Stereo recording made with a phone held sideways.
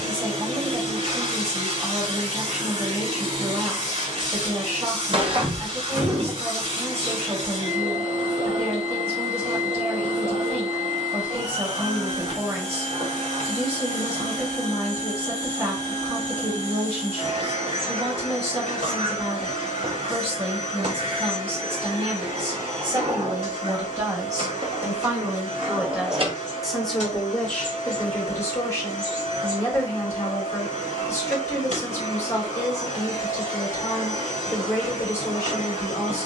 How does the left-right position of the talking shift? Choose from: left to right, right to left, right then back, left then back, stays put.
right to left.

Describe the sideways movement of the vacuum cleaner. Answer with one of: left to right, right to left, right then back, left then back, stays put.
stays put.